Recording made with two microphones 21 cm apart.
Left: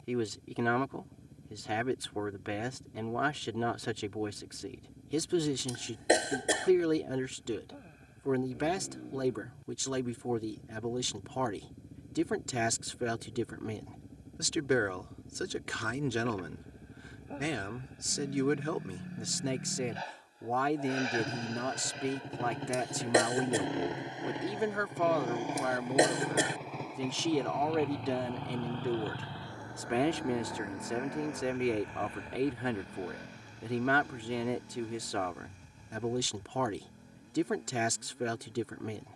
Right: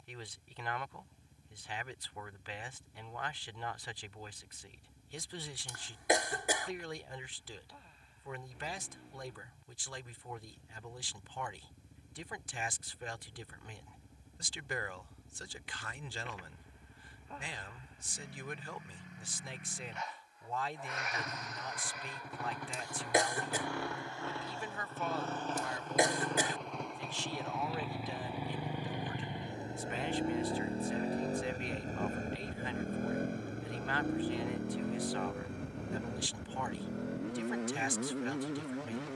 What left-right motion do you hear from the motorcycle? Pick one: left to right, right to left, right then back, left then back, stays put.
left to right.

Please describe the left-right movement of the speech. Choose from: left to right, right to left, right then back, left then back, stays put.
stays put.